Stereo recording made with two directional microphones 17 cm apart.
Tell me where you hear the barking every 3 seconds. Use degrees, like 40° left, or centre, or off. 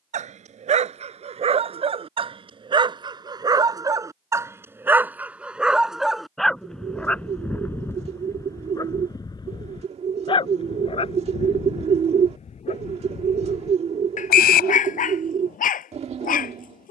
40° right, 10° right, 10° left, 30° left, 40° left, 50° left.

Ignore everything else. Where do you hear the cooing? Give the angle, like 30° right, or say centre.
40° right.